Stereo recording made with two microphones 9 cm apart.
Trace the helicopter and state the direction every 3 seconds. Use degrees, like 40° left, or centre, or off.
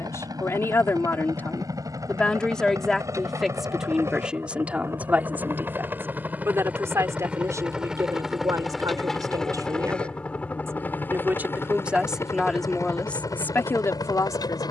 40° right, 30° right, 10° right, 10° left, 40° left.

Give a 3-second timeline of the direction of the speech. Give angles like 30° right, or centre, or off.
20° left, 10° right, 40° right, 30° right, 20° left.